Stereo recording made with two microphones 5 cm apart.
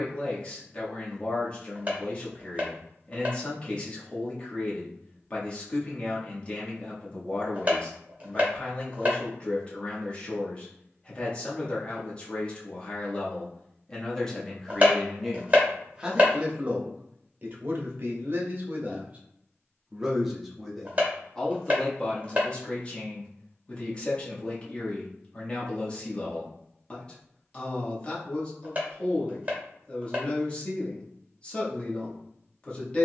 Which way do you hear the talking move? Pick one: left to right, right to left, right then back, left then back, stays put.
right then back.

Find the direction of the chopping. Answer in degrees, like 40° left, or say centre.
30° right.